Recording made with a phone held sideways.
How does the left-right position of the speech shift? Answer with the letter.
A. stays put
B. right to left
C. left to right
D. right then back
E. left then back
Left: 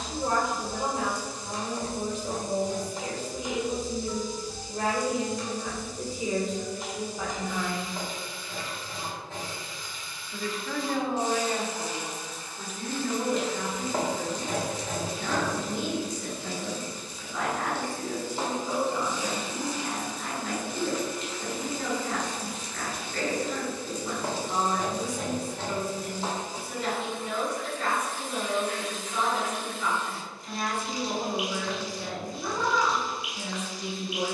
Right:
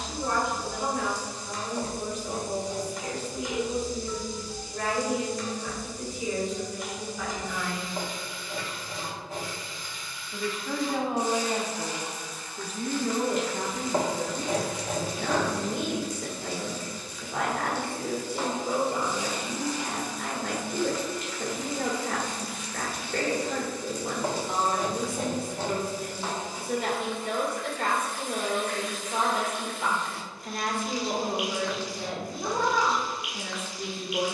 C.